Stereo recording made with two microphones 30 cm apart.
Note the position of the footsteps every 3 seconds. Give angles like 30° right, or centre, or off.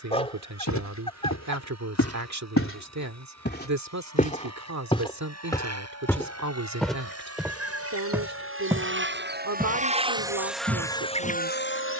60° left, 20° left, centre, 20° right.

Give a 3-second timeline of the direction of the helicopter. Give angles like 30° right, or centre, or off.
70° right, 70° right, 60° right, centre.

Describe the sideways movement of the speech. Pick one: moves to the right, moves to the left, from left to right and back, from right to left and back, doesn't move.
doesn't move.